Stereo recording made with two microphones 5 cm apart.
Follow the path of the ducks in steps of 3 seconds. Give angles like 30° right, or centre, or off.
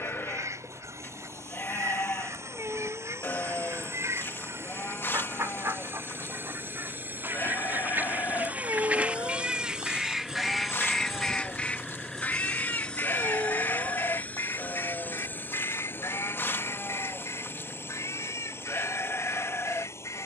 70° right, 60° right, 40° right, centre, 50° left, 70° left, 80° left.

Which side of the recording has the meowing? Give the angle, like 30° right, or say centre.
60° right.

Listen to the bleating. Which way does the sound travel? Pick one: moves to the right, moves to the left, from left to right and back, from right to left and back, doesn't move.
doesn't move.